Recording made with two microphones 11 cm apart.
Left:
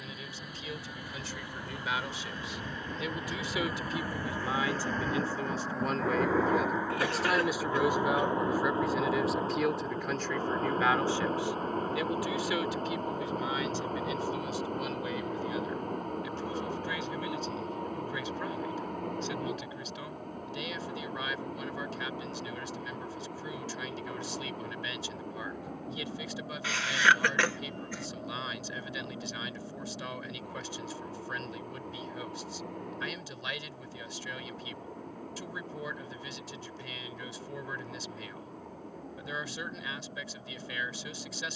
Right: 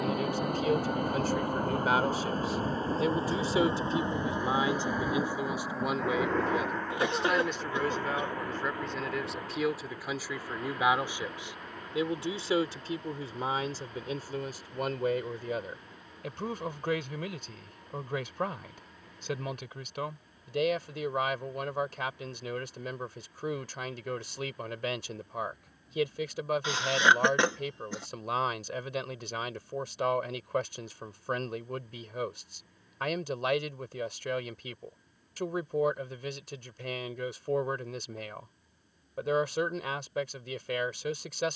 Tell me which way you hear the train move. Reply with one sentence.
In this clip you hear the train move to the left.